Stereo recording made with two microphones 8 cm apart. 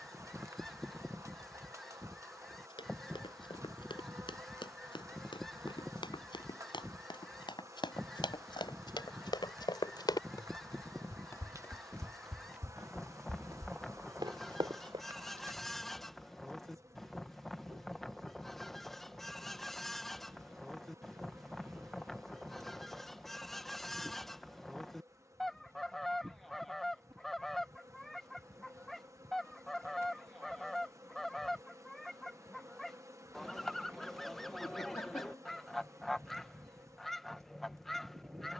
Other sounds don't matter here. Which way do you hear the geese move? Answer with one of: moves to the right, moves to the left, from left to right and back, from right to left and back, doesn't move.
doesn't move.